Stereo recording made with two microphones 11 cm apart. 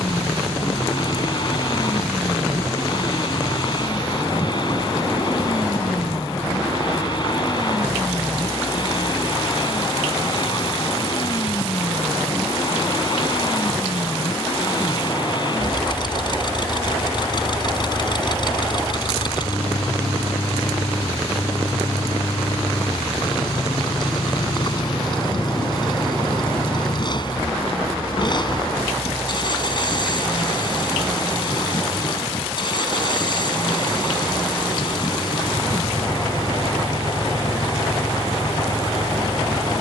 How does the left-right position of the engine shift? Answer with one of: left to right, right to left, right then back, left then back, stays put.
stays put.